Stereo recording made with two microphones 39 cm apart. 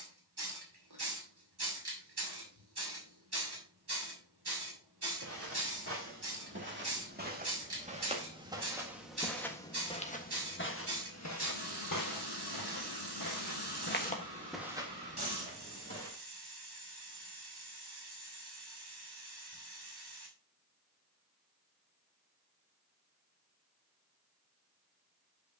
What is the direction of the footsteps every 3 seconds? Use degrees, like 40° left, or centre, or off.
off, 30° right, 20° right, 30° left, 40° left, 30° right, off, off, off.